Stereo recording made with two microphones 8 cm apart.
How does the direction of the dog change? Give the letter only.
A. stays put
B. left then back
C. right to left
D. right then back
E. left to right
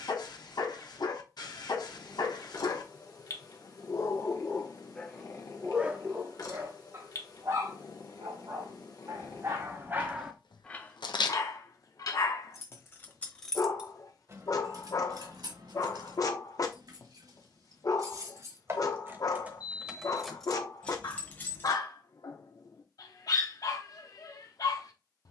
D.